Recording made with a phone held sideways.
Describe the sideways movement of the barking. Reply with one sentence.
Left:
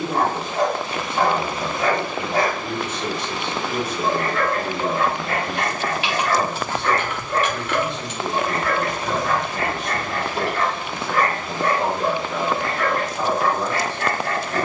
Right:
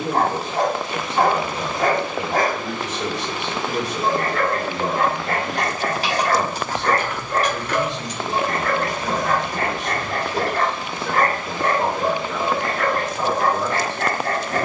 You can hear the barking stay put.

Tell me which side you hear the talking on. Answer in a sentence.
In this clip you hear the talking on the right.